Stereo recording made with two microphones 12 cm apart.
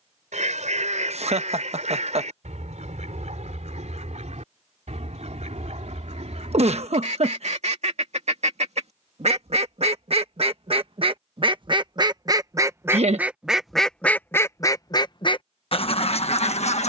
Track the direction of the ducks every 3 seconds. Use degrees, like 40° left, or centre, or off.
70° right, 70° right, 60° right, 50° right, centre, 50° left.